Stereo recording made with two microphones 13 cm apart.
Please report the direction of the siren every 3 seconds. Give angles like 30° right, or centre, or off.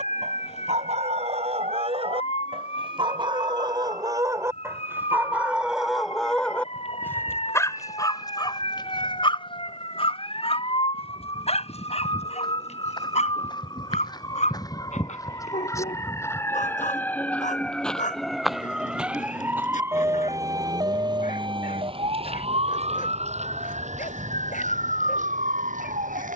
60° left, 50° left, 50° left, 40° left, 30° left, 20° left, 10° right, 50° right, 70° right.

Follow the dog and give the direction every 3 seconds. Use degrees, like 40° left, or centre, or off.
50° right, 20° right, 20° left, 50° left, 60° left, 60° left, 70° left, 70° left, 70° left.